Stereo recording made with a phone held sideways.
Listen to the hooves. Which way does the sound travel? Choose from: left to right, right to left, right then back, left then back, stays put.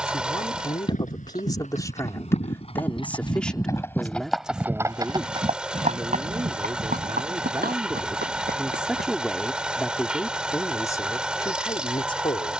left to right.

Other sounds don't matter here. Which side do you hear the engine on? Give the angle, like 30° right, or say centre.
10° right.